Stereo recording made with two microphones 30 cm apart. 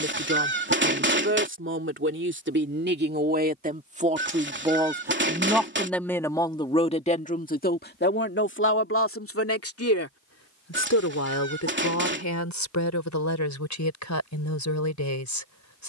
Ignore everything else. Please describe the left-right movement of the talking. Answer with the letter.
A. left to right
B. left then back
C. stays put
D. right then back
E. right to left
E.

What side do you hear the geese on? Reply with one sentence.
In this clip you hear the geese on the right.